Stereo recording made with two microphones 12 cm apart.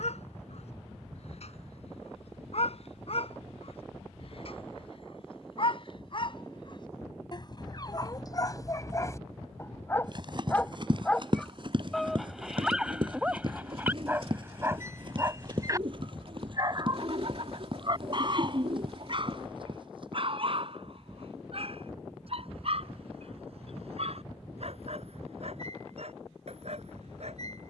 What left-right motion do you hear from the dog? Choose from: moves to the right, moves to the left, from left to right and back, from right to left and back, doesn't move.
moves to the right.